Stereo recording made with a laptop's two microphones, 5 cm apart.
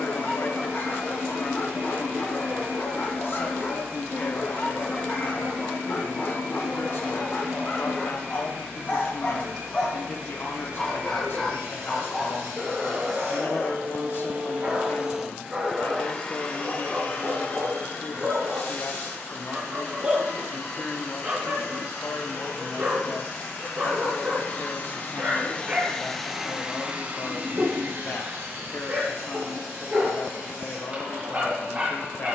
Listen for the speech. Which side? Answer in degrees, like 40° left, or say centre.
50° left.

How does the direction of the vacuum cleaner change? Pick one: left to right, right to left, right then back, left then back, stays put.
left then back.